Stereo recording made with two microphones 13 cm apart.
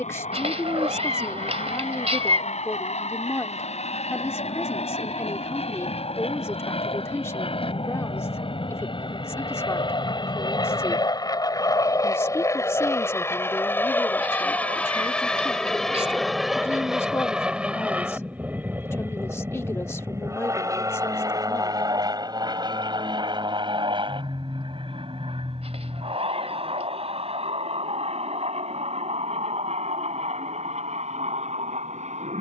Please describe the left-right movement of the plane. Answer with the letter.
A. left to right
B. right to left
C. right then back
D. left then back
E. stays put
A.